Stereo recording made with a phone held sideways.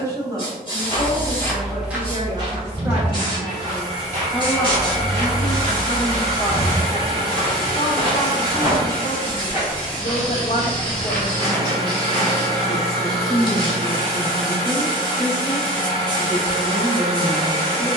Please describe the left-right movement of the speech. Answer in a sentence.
In this clip you hear the speech go left and come back.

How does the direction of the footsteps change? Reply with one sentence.
In this clip you hear the footsteps move from left to right and back again.